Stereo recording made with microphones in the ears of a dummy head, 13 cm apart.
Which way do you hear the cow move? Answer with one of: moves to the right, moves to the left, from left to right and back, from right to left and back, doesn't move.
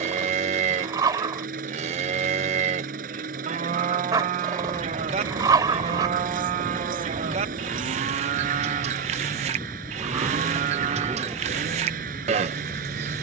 doesn't move.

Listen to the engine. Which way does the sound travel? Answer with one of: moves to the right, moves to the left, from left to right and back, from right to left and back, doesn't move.
doesn't move.